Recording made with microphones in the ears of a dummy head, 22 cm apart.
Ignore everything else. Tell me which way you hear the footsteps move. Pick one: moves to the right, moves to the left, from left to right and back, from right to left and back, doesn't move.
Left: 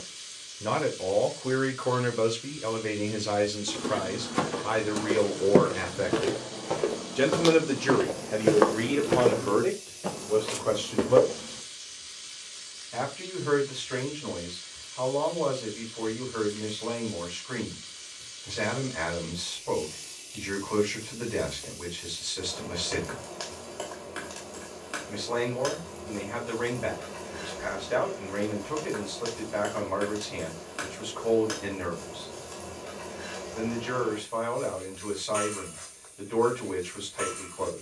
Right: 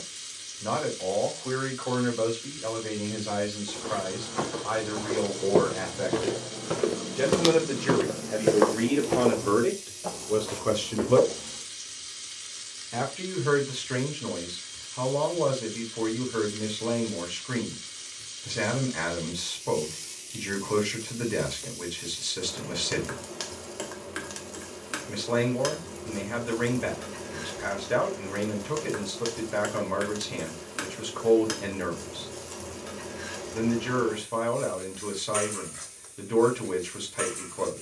from left to right and back.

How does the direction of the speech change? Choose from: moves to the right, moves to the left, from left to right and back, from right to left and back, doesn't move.
moves to the right.